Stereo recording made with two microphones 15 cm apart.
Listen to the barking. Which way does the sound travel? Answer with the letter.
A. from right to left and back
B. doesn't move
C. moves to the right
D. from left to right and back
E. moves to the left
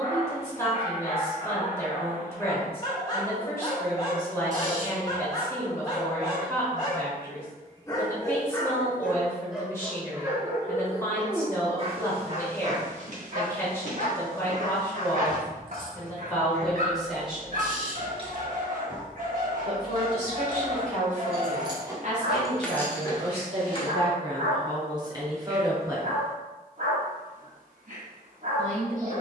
C.